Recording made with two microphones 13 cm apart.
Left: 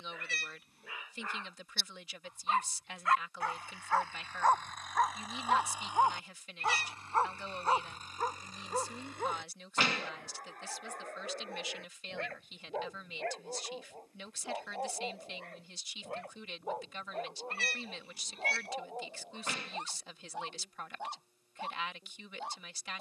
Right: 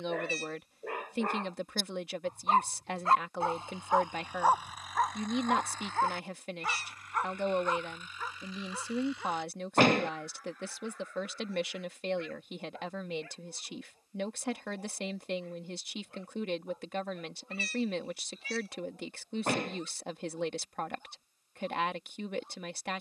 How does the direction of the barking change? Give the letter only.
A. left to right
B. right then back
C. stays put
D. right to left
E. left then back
D.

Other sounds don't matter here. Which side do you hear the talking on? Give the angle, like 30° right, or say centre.
60° right.